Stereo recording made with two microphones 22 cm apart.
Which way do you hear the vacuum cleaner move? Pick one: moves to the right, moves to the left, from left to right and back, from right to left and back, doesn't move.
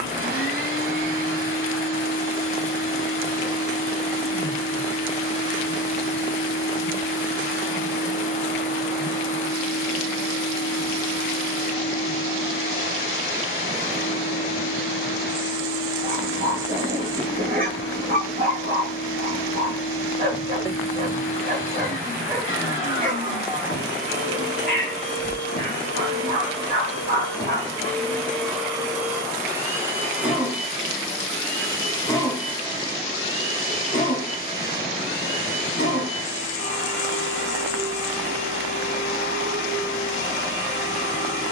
from left to right and back.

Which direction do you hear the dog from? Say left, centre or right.
right.